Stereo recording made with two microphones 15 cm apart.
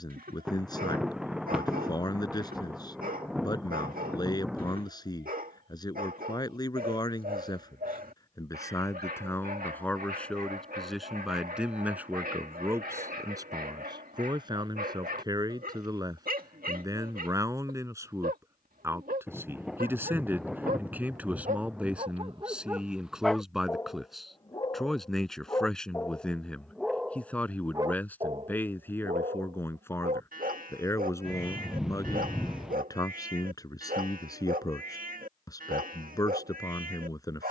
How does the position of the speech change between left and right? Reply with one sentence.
In this clip you hear the speech go right and come back.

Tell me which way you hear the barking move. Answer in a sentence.
You can hear the barking go left and come back.